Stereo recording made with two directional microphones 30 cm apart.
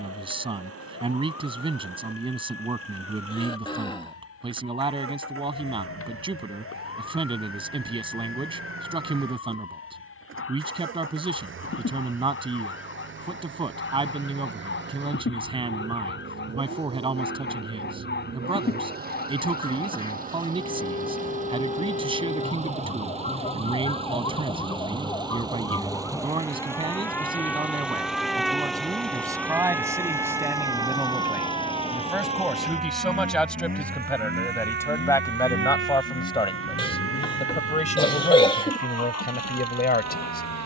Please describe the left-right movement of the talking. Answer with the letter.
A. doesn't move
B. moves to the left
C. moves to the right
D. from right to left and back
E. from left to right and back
B.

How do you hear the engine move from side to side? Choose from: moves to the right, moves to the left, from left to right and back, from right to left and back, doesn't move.
moves to the left.